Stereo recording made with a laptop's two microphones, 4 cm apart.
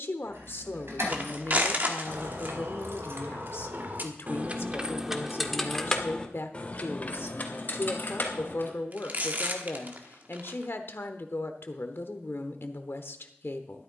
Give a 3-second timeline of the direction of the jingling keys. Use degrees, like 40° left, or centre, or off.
80° right, 30° right, 40° left, off, off.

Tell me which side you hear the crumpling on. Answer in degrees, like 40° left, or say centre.
40° right.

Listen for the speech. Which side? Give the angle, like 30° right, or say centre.
70° left.